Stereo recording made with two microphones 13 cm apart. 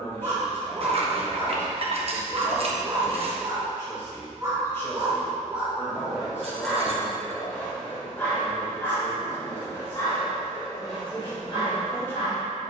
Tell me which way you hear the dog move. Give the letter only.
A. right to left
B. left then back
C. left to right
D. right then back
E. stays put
A.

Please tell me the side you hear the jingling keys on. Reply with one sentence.
You can hear the jingling keys on the right.